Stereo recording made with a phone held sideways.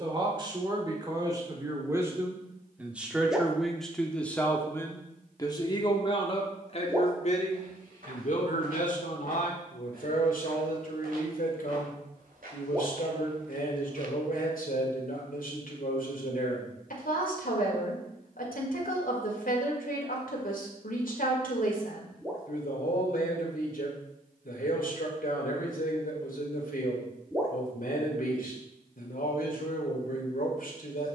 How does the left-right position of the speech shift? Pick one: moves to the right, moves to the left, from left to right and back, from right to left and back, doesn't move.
moves to the left.